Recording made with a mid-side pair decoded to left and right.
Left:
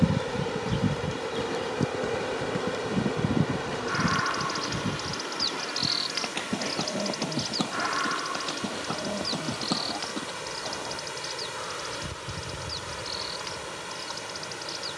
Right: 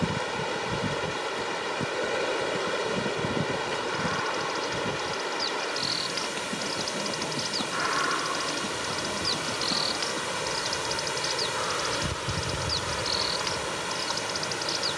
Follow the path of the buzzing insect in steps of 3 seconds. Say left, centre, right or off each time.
left, left, centre, right, right.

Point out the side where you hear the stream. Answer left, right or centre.
right.